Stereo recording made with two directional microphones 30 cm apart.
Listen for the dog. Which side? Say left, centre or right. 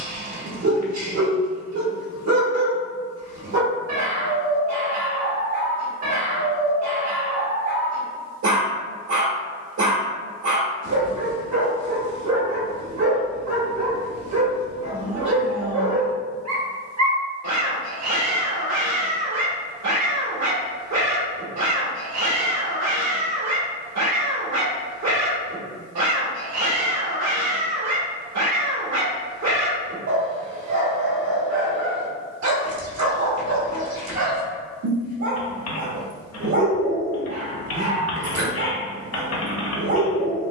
right.